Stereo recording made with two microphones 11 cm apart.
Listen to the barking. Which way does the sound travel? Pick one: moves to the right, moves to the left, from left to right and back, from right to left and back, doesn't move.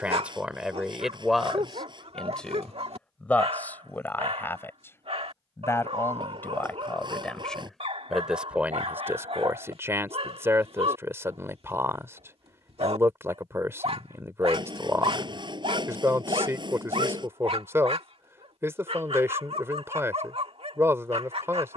doesn't move.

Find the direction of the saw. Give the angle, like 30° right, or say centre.
40° right.